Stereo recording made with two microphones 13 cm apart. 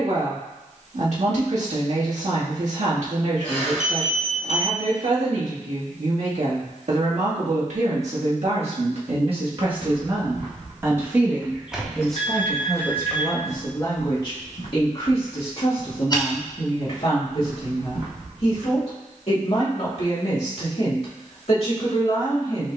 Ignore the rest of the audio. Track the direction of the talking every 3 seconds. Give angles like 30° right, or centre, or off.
60° right, 60° right, 60° right, 30° right, 20° left, 50° left, 50° left, 50° left.